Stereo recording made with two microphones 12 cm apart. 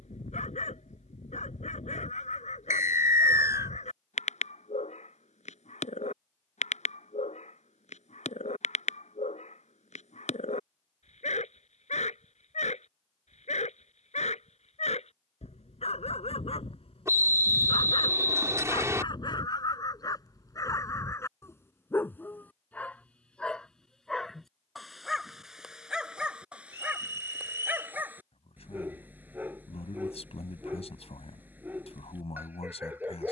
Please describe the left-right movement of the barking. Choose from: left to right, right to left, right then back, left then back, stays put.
left to right.